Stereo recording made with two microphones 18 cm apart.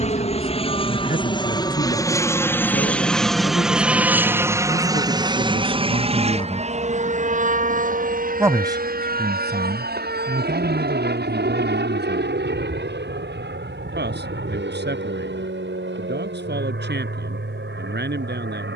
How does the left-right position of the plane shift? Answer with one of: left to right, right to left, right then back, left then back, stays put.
left to right.